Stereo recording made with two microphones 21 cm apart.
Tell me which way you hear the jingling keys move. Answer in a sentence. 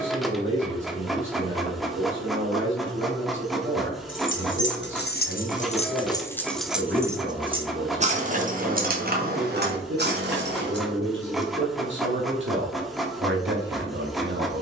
In this clip you hear the jingling keys travel towards the right.